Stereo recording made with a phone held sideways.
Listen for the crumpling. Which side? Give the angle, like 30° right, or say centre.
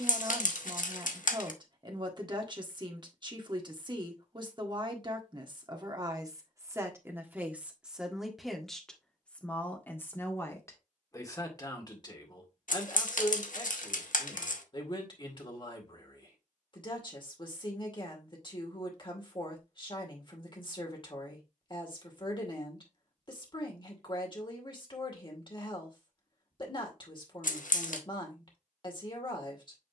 70° left.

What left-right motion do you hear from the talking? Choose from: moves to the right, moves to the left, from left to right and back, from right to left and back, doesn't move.
moves to the left.